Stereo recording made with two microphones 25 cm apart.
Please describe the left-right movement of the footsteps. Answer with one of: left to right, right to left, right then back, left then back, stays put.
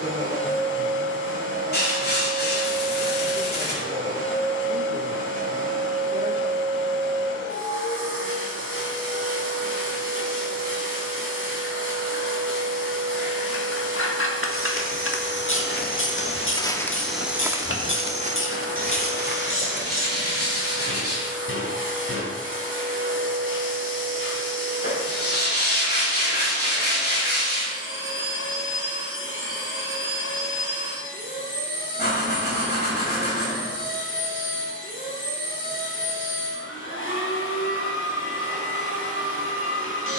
left to right.